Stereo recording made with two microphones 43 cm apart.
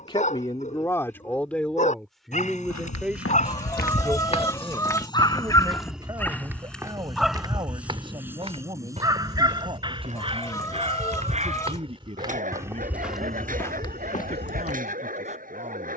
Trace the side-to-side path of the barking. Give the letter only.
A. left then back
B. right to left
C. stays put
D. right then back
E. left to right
E.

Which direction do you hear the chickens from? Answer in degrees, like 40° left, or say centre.
10° left.